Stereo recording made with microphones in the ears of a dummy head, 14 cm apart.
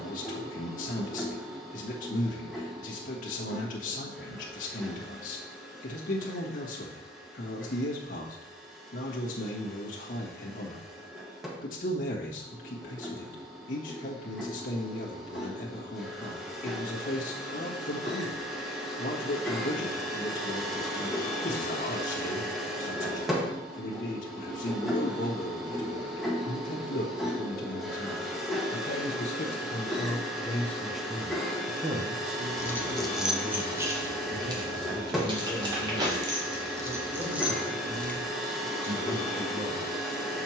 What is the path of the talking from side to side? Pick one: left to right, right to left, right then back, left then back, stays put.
left to right.